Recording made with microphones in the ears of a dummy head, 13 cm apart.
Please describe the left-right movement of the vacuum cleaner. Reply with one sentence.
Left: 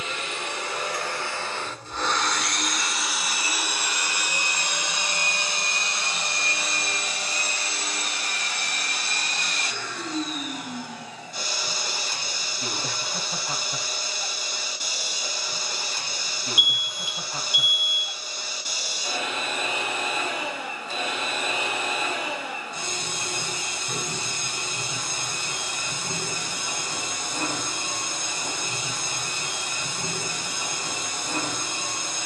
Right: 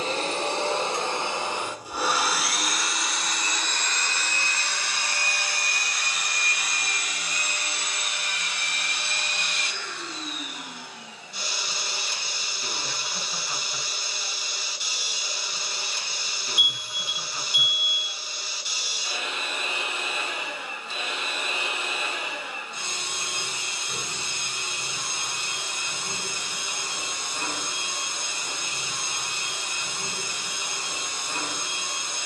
In this clip you hear the vacuum cleaner go from the right side to the left.